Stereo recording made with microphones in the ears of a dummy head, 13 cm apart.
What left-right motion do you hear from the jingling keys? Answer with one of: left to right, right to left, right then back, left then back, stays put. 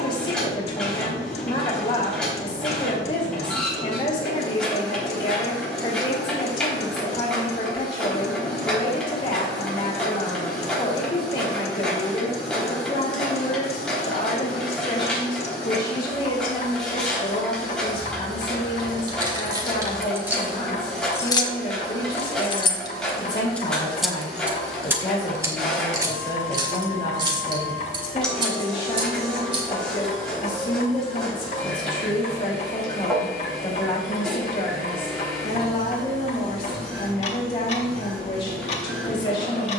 left then back.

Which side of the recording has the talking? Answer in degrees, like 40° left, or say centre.
30° left.